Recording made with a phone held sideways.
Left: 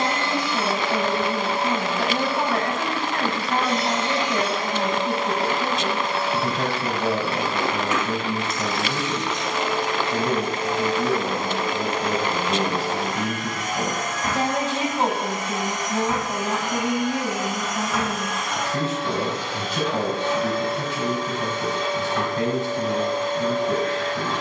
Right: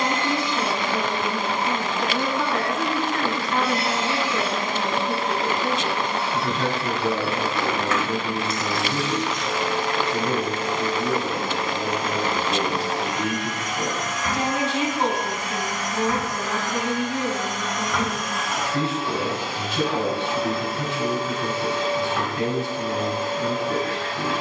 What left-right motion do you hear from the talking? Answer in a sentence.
In this clip you hear the talking stay in one place.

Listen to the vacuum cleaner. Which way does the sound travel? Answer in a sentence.
In this clip you hear the vacuum cleaner go left and come back.